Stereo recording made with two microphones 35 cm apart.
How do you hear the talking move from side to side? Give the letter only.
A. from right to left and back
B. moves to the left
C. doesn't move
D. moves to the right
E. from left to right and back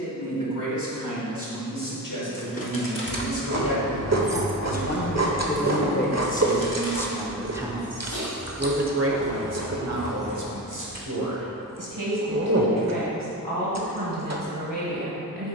D.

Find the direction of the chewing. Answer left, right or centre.
right.